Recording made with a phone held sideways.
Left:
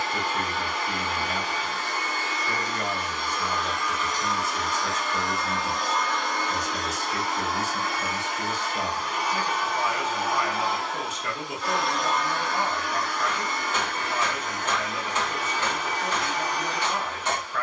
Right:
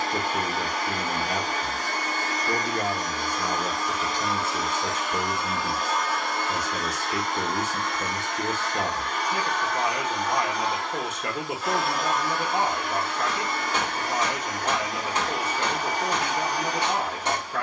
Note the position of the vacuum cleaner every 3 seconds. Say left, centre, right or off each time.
right, right, centre, centre, right, right.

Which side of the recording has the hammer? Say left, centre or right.
right.